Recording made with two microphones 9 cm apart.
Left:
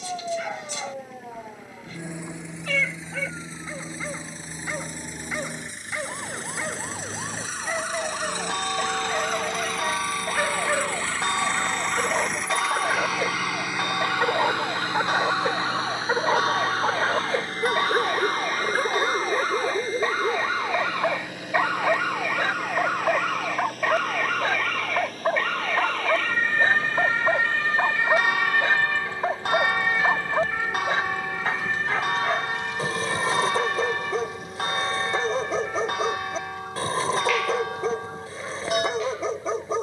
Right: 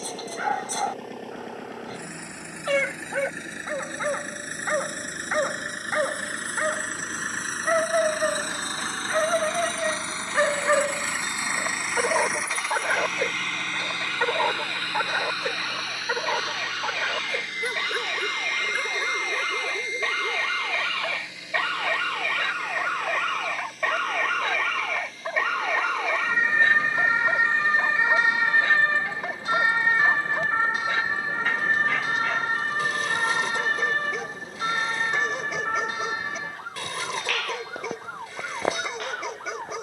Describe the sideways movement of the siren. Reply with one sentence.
In this clip you hear the siren travel towards the right.